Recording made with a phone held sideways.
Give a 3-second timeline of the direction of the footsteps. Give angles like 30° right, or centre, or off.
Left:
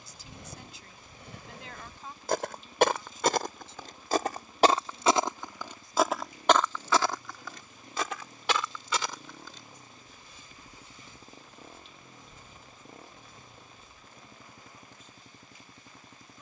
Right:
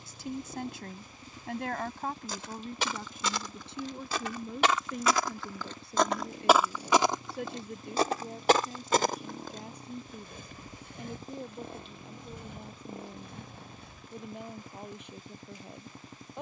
70° left, 40° left, 20° right, 60° right, 70° right, off.